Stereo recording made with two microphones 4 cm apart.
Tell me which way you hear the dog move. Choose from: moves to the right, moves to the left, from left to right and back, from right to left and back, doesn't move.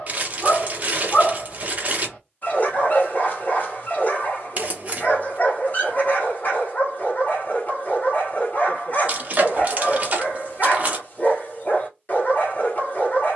doesn't move.